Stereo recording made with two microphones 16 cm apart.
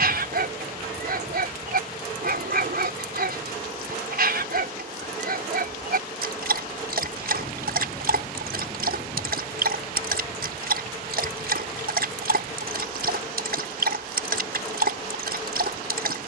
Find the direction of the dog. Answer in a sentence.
In this clip you hear the dog on the right.